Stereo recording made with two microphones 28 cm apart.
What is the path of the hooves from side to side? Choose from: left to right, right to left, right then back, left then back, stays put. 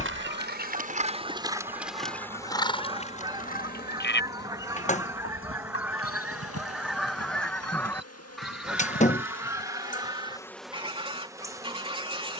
right to left.